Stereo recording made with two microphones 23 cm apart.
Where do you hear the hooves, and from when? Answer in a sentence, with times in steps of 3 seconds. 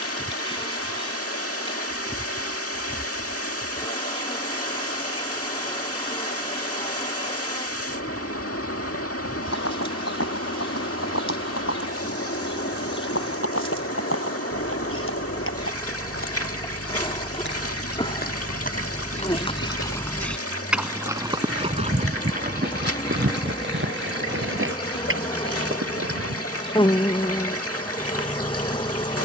In this clip you hear the hooves not at all from 0 s, on the left from 9 s, on the right from 21 s and not at all from 27 s.